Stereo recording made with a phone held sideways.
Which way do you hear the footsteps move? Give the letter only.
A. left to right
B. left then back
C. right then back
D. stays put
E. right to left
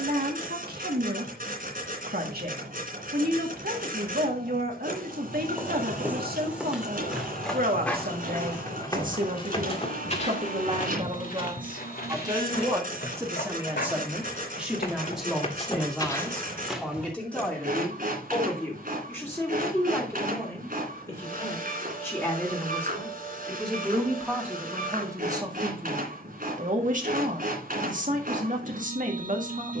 B.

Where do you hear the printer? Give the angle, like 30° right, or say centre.
60° right.